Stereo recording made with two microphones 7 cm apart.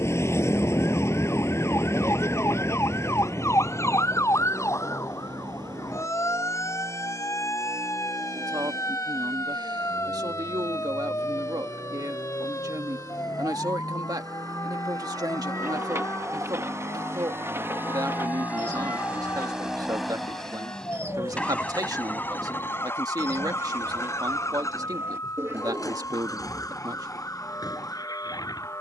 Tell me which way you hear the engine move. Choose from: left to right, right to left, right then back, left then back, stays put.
right to left.